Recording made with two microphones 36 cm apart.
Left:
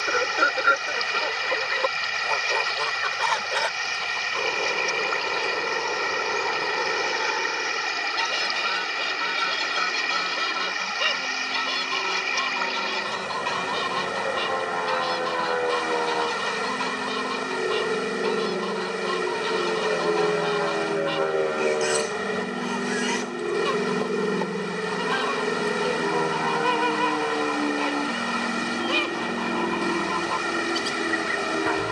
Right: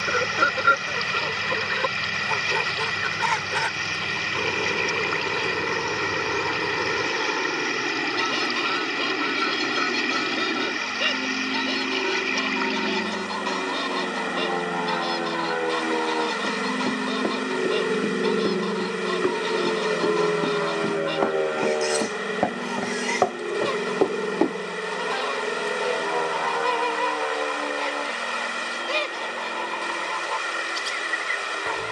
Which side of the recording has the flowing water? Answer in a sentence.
You can hear the flowing water on the left.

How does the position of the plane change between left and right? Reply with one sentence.
In this clip you hear the plane go from the right side to the left.